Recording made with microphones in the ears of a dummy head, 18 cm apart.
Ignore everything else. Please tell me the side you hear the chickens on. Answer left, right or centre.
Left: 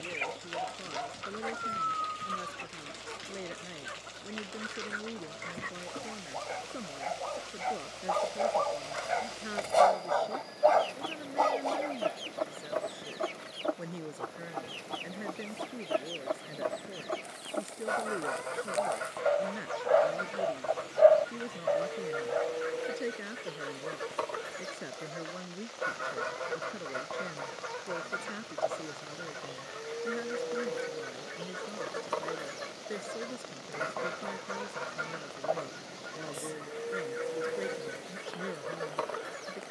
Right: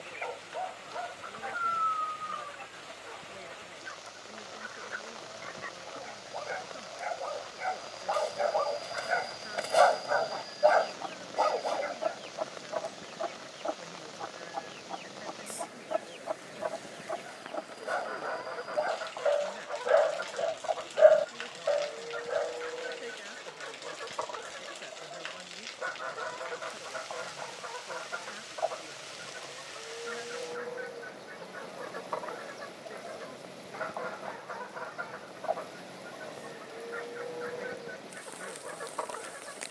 left.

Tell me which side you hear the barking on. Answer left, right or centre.
centre.